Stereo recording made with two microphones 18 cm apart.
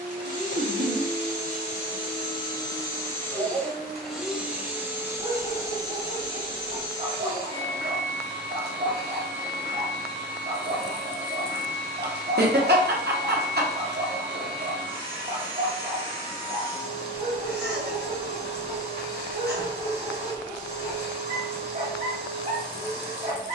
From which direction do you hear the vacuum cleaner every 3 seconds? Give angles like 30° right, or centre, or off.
40° left, 10° right, 30° right, 40° right, 40° right, 40° right, 40° right, 40° right.